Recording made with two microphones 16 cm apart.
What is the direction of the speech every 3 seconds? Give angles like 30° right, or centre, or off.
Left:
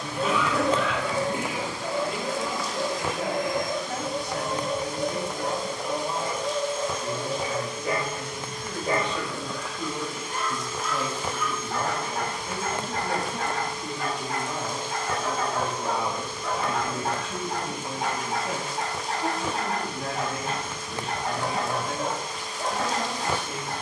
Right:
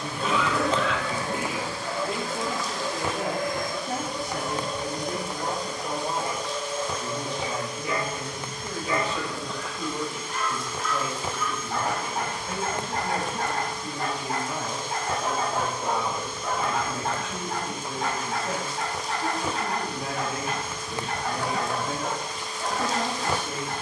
40° right, 40° right, 20° right, 10° left, 50° left, 40° left, centre, 30° right.